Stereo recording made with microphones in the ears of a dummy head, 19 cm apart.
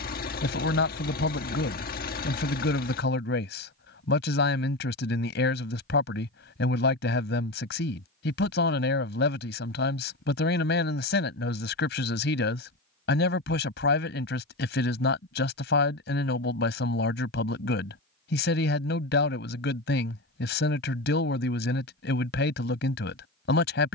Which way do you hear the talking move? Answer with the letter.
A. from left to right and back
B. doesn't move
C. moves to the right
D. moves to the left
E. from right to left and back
B.